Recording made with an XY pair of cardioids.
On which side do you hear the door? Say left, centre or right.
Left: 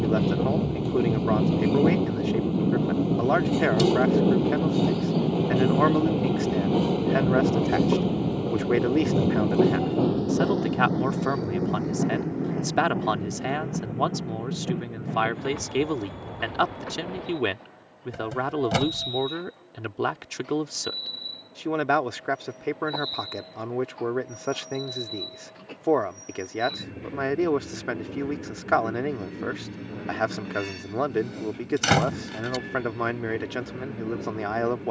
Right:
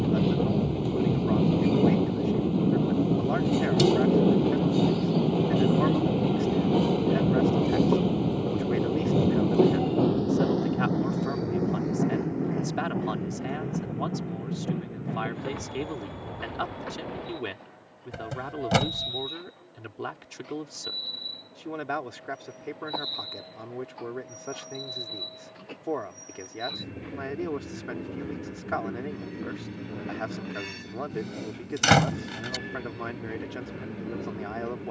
centre.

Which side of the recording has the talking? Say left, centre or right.
left.